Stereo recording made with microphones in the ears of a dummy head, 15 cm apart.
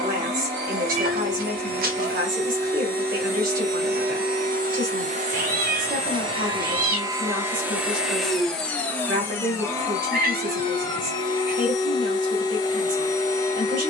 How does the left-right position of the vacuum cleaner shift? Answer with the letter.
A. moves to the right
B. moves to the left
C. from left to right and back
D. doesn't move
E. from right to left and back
B.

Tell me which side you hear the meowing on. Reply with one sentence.
In this clip you hear the meowing on the right.